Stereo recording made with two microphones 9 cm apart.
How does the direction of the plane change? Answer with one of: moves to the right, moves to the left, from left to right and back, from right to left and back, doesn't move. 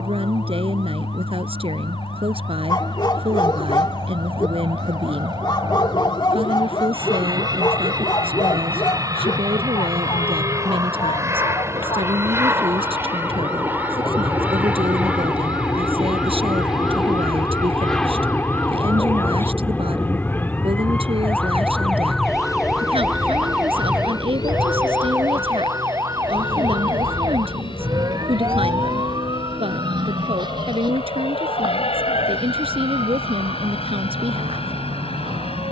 moves to the left.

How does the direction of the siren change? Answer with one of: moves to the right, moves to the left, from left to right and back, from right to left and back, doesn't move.
moves to the right.